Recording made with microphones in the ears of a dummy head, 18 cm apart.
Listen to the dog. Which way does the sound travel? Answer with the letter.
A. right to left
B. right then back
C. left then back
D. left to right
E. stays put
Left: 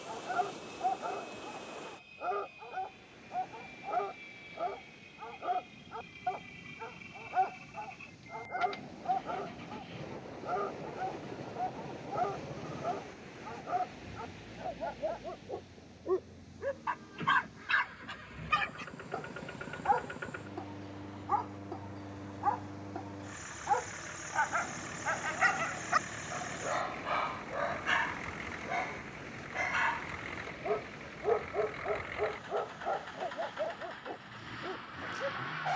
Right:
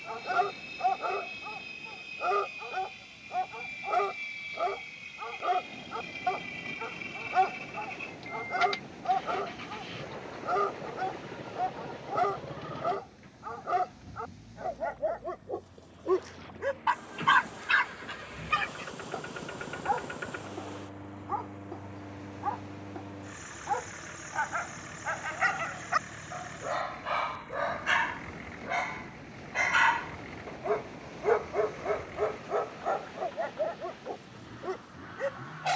C.